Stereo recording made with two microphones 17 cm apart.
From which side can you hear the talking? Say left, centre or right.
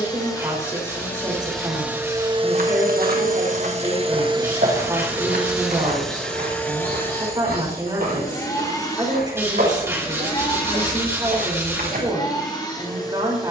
right.